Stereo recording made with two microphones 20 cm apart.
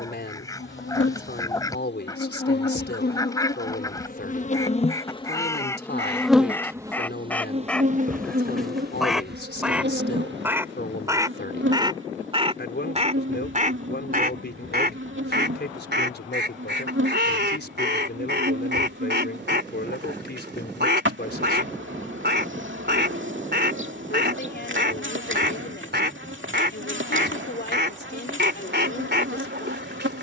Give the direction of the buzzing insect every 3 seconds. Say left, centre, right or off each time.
left, left, right, right, right, right, right, right, right, right.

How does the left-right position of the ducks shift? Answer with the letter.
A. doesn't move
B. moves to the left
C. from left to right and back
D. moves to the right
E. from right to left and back
D.